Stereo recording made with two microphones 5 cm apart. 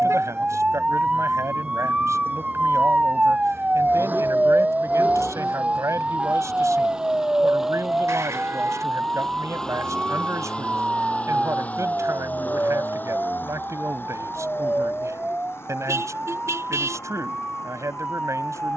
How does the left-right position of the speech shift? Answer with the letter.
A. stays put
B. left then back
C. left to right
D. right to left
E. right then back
A.